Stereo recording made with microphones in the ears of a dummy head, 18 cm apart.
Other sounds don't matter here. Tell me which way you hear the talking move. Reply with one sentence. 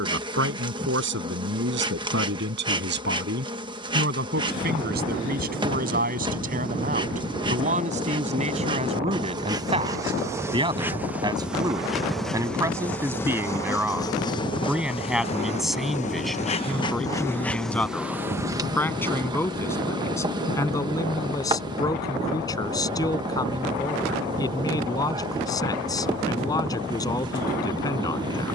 You can hear the talking move from right to left.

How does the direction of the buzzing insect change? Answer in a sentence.
You can hear the buzzing insect move from right to left and back again.